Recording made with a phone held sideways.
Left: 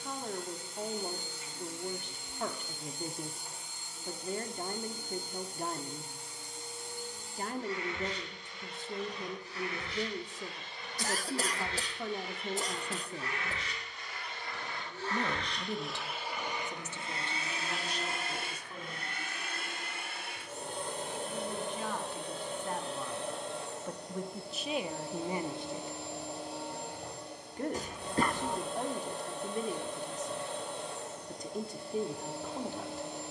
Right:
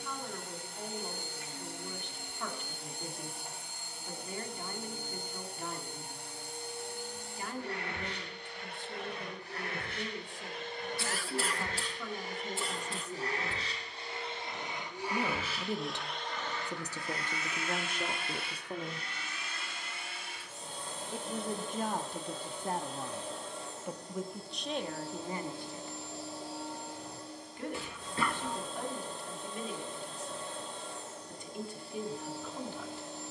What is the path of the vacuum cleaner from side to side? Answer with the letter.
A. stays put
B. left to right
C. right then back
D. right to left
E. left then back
D.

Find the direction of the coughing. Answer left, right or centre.
left.